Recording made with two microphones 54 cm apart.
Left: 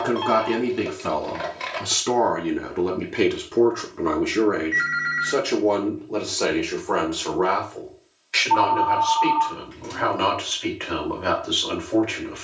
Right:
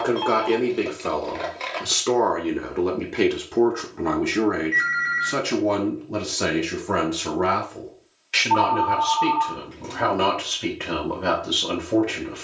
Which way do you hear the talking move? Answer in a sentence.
You can hear the talking move from left to right.